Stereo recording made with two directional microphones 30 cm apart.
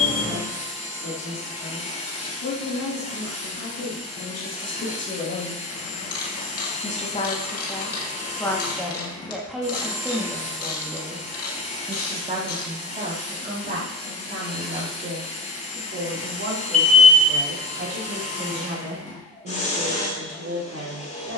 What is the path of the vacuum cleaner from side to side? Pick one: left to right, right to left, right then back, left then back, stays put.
stays put.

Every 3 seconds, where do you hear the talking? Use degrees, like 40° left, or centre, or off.
60° left, 40° left, 10° left, 10° right, 30° right, 40° right, 50° right.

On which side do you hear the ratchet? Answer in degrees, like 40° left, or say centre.
50° left.